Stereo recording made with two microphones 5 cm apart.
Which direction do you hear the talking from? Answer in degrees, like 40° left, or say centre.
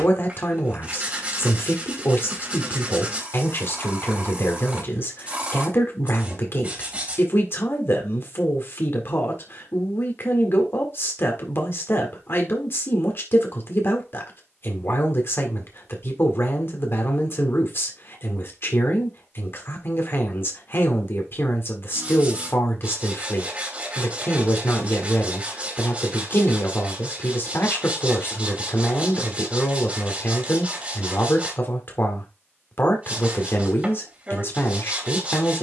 60° left.